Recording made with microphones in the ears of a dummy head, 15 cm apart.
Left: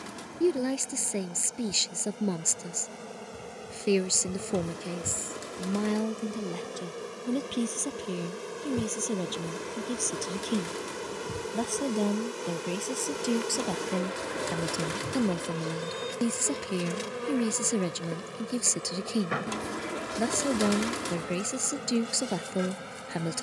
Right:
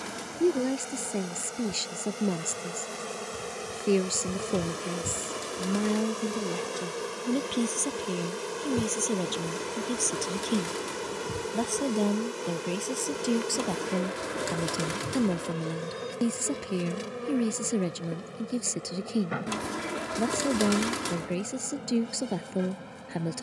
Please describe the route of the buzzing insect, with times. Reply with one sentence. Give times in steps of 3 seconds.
You can hear the buzzing insect on the right from 0 s, in the centre from 9 s and on the left from 15 s.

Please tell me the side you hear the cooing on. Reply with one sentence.
In this clip you hear the cooing in the centre.